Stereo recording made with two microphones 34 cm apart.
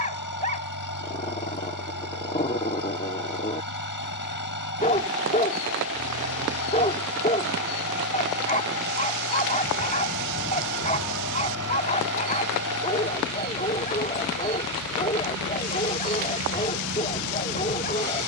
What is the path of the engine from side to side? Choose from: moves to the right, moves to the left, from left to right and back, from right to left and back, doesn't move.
doesn't move.